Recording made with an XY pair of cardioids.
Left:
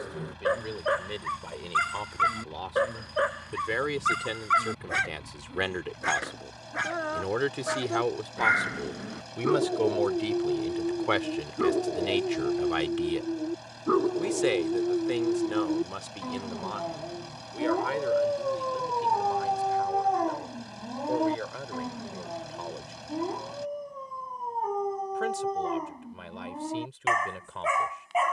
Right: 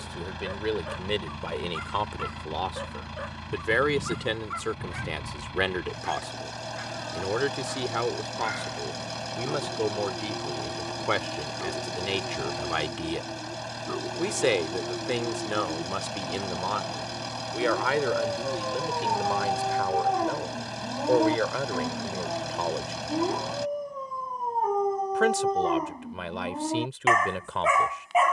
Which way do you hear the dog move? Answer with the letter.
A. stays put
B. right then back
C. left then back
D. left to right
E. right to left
D.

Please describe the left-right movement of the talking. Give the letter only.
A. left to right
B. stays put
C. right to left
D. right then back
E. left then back
E.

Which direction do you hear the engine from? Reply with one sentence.
You can hear the engine on the right.